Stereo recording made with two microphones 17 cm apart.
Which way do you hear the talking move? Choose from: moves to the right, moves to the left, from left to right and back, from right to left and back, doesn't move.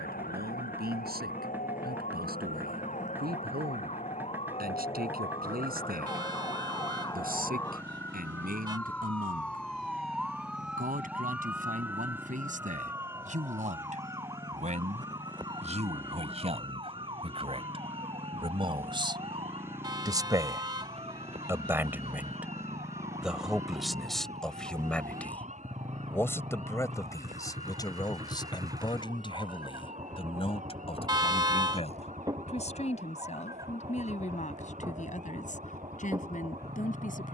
moves to the left.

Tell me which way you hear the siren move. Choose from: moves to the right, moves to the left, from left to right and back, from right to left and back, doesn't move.
moves to the right.